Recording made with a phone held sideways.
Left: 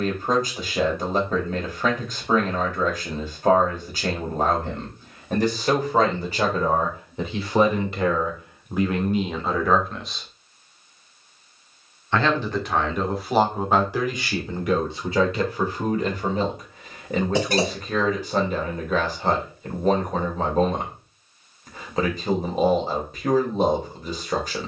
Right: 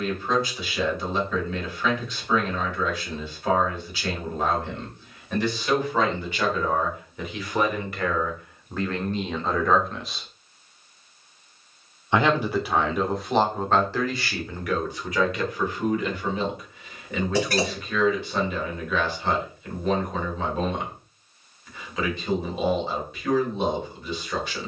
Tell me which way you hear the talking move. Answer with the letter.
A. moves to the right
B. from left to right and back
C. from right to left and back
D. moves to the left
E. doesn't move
B.